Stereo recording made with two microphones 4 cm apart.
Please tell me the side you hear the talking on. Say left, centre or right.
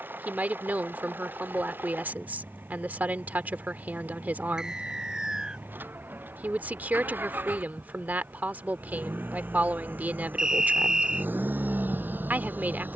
right.